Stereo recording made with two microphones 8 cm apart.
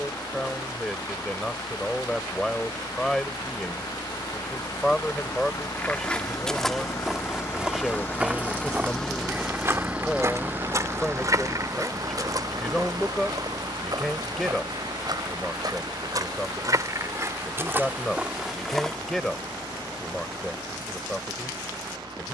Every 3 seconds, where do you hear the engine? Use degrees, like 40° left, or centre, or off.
70° left, 60° left, 30° left, 20° right, 60° right, 70° right, 80° right, 80° right.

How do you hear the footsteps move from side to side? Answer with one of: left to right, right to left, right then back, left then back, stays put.
right then back.